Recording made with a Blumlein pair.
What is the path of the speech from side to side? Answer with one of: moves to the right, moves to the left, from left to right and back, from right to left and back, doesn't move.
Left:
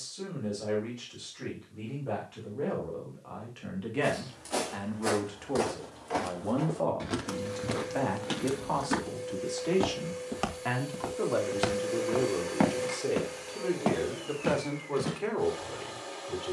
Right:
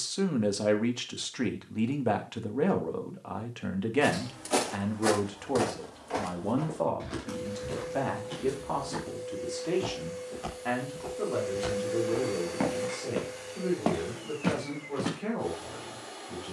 moves to the left.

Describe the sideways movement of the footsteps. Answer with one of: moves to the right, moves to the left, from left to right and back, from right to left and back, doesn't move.
from right to left and back.